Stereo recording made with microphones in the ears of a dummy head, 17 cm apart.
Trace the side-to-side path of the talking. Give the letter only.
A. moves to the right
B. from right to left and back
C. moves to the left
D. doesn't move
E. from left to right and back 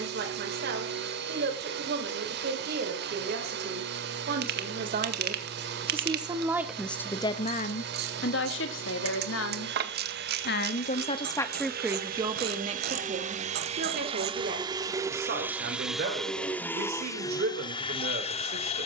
B.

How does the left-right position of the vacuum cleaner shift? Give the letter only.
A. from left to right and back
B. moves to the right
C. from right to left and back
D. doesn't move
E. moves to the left
E.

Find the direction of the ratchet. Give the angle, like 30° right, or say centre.
50° right.